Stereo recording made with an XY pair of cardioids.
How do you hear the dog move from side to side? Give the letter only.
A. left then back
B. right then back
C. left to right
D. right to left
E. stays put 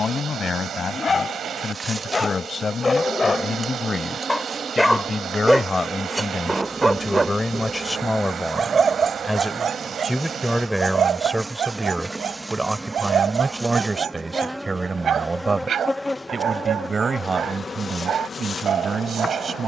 C.